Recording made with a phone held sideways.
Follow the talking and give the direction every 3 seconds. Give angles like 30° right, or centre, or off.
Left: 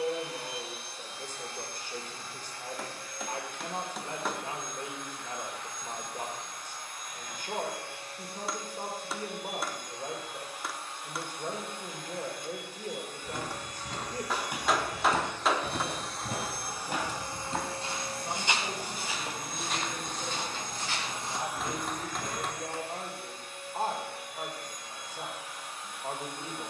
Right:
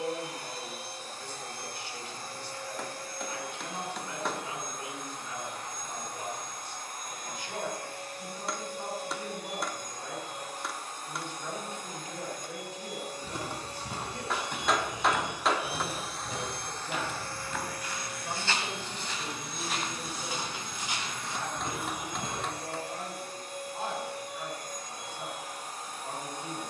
40° left, 40° left, 40° left, 40° left, 40° left, centre, 10° left, 30° left, 40° left.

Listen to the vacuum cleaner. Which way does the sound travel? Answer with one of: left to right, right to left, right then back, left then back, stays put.
left then back.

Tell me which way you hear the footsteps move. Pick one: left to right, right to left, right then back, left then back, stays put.
left then back.